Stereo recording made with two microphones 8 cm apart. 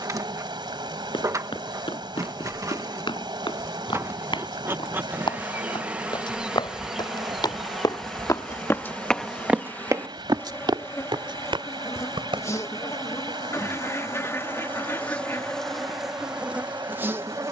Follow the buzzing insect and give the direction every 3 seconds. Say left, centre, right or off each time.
right, right, centre, left, left, centre.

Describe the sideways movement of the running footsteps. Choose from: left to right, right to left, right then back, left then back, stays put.
left to right.